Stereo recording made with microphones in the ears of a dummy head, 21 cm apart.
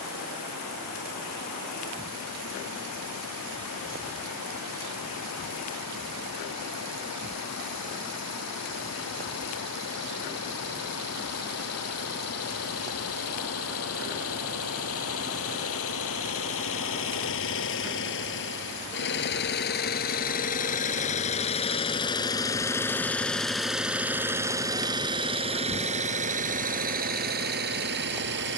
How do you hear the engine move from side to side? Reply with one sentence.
In this clip you hear the engine travel towards the right.